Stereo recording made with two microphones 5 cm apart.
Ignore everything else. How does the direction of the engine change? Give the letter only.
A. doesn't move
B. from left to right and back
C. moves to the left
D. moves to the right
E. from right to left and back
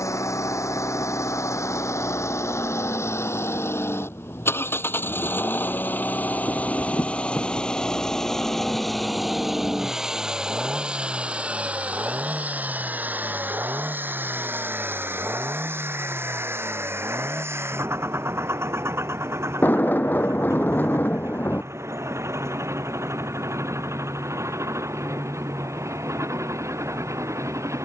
D.